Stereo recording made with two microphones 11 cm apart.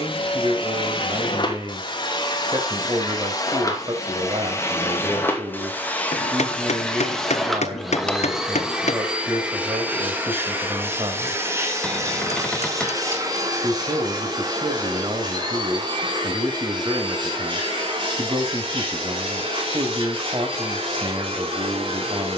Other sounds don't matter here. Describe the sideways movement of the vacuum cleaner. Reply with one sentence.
In this clip you hear the vacuum cleaner travel towards the right.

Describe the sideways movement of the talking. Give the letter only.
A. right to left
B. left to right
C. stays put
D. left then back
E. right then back
C.